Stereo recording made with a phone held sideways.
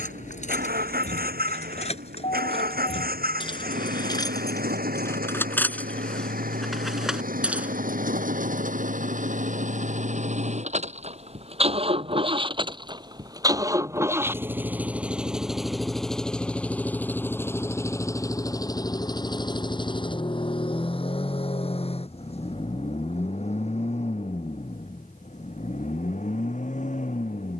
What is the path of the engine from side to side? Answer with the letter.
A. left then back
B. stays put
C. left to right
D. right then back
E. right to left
E.